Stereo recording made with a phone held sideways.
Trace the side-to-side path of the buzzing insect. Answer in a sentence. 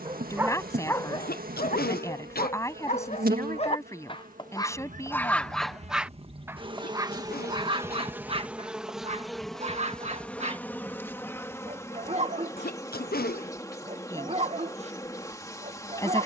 You can hear the buzzing insect move from right to left.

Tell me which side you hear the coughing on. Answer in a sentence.
You can hear the coughing on the left.